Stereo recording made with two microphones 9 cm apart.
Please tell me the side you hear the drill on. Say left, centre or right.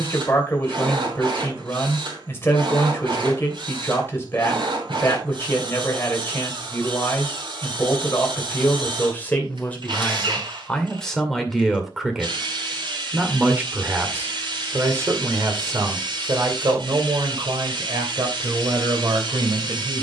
right.